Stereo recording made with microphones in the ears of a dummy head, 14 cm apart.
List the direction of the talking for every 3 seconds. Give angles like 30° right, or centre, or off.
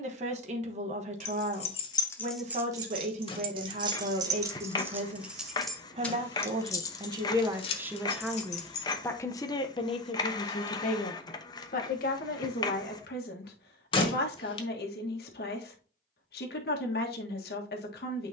50° right, 50° right, 20° right, 40° left, 70° left, 70° left.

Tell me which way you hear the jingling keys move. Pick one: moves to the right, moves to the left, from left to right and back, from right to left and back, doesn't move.
from left to right and back.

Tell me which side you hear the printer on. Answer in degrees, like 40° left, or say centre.
30° left.